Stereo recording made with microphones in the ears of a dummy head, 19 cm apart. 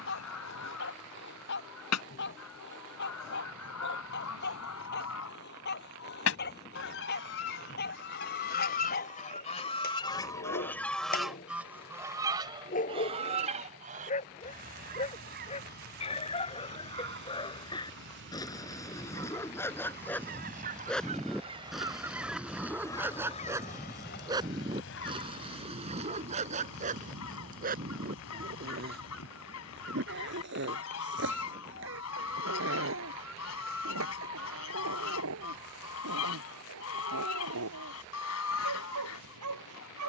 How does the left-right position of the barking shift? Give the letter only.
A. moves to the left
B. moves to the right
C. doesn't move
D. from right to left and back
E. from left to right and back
B.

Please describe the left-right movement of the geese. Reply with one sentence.
In this clip you hear the geese move from left to right and back again.